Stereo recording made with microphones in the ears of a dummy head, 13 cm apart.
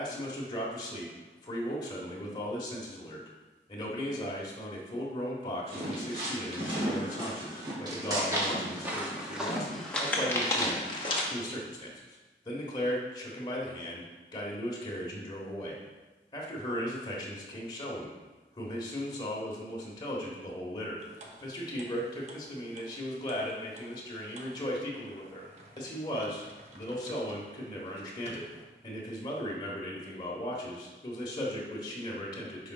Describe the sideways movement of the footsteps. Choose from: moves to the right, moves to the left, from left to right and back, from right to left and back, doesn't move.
moves to the left.